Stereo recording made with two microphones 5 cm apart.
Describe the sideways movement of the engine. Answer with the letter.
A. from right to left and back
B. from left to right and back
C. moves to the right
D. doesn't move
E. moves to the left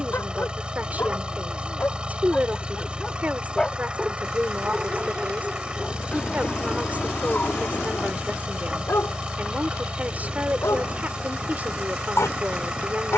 D.